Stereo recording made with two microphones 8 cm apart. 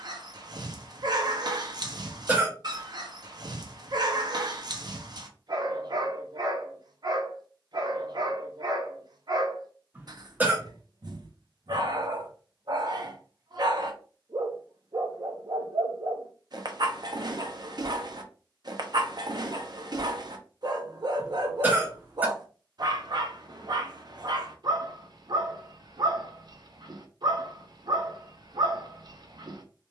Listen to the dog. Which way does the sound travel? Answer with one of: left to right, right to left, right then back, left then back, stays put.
stays put.